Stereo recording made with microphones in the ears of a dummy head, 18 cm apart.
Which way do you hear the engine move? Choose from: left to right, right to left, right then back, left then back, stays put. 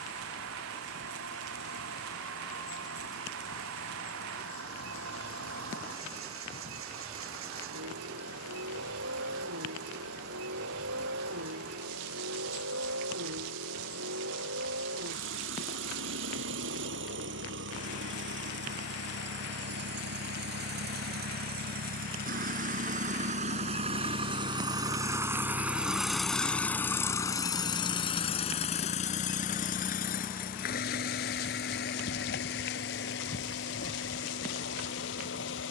right to left.